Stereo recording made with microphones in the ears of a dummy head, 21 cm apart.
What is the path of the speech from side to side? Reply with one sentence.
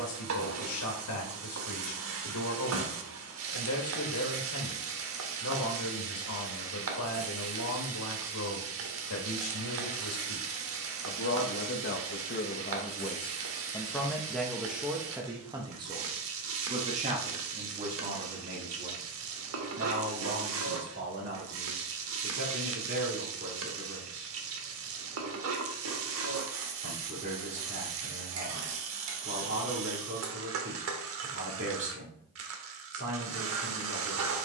You can hear the speech go from the left side to the right.